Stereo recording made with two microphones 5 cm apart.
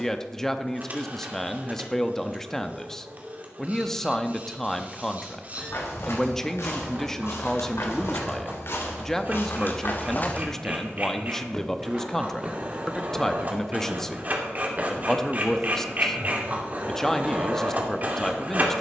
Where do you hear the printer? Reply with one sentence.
In this clip you hear the printer on the right.